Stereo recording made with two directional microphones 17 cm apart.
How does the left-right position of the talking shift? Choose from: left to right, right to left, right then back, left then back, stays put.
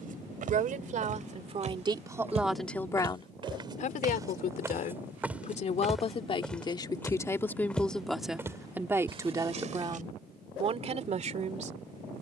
left then back.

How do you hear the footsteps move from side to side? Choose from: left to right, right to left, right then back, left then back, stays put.
left then back.